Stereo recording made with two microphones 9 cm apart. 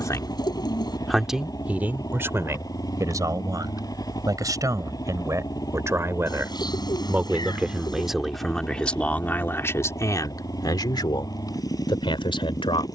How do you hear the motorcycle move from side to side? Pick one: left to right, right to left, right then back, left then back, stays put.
stays put.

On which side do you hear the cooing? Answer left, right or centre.
left.